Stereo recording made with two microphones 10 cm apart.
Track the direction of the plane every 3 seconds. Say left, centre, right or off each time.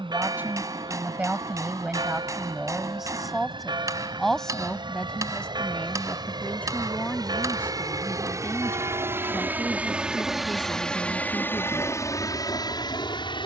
right, right, right, centre, left.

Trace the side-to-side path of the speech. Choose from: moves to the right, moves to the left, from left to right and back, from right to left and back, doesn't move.
moves to the left.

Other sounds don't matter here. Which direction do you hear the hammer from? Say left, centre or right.
right.